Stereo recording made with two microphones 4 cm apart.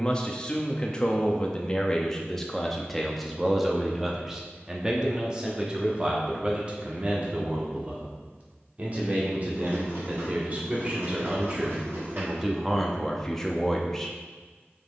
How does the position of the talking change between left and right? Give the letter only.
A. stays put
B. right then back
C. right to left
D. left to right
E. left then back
B.